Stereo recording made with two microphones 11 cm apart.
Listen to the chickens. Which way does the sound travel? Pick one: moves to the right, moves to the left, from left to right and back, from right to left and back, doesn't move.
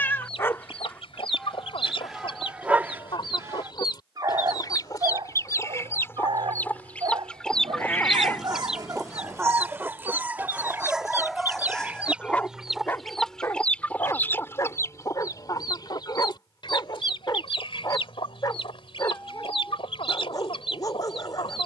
from left to right and back.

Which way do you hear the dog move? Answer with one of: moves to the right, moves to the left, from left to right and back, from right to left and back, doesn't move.
from left to right and back.